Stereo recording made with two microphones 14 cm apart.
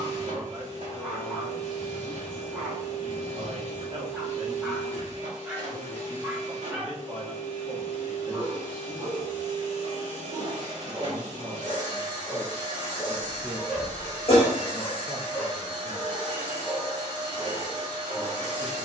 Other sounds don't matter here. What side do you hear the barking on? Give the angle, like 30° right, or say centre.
10° right.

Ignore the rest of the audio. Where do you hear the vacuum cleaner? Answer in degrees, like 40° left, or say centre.
60° right.